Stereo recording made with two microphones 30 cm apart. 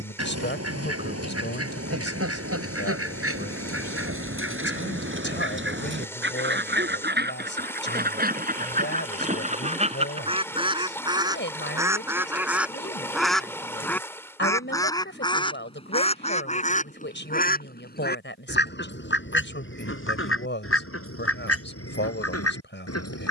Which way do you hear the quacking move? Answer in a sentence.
In this clip you hear the quacking go from the right side to the left.